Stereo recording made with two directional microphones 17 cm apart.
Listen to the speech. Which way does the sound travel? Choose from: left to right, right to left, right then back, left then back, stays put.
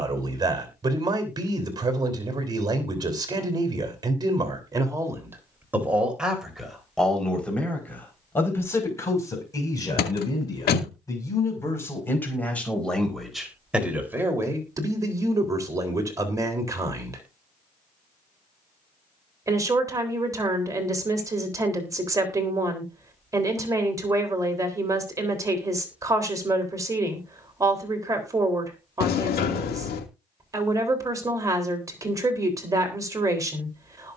left then back.